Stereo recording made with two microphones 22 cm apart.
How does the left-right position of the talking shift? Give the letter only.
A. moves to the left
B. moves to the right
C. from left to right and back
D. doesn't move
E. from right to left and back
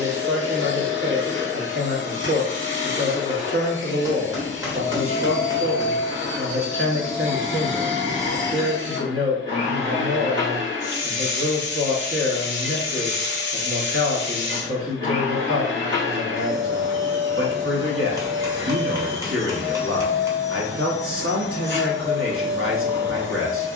D.